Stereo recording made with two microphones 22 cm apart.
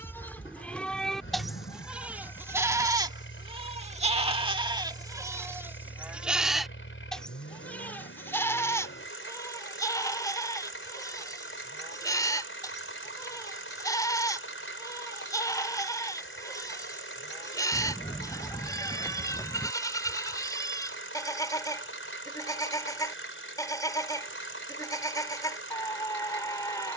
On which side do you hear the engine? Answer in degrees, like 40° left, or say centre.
70° left.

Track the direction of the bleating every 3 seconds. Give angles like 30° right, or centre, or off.
centre, 20° right, 10° left, 20° left, 20° left, 20° left, 20° left, 20° left, 20° left.